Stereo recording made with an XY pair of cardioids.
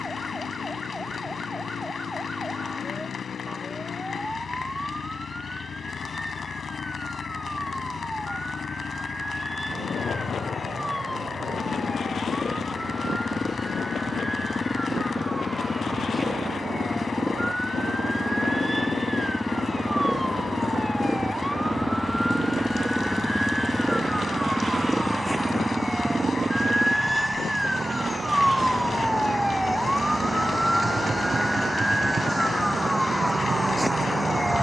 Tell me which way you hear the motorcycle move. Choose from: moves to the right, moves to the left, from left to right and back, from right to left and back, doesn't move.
moves to the right.